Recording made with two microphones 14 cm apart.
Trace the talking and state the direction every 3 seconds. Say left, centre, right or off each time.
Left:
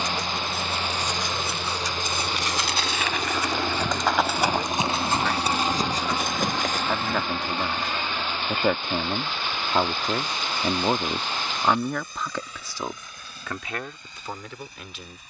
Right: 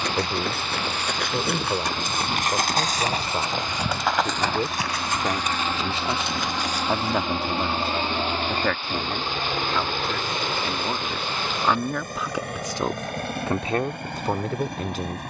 right, right, centre, left, right.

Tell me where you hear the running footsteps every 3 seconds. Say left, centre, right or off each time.
right, centre, left, off, off.